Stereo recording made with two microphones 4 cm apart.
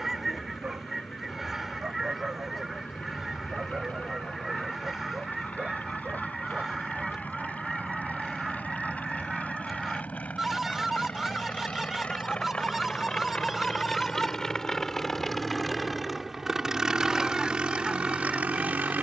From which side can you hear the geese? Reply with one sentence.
You can hear the geese in the centre.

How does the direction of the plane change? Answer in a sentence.
In this clip you hear the plane travel towards the right.